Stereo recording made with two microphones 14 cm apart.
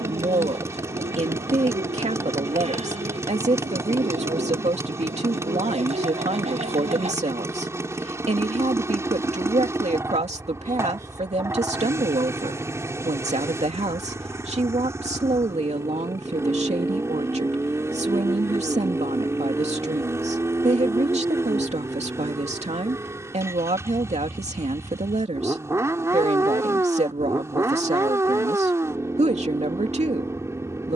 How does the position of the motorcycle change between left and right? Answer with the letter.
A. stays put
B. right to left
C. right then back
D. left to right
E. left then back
A.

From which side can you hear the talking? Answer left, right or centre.
right.